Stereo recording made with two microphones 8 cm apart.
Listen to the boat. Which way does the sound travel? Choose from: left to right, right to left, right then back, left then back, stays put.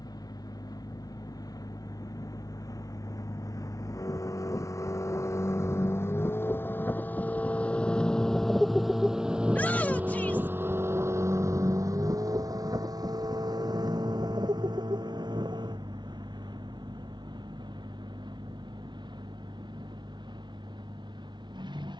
left to right.